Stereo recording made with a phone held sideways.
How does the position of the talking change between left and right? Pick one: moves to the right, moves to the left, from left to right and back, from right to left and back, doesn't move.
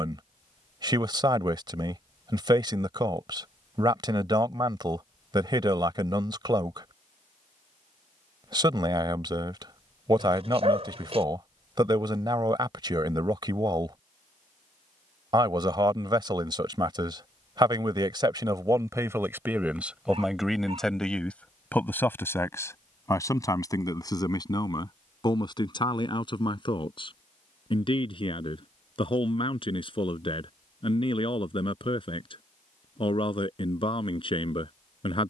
moves to the left.